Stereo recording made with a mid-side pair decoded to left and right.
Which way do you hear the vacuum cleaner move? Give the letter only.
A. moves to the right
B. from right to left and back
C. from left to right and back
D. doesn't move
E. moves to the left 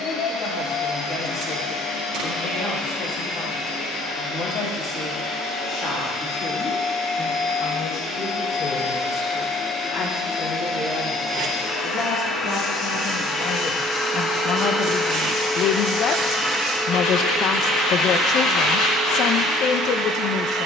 A.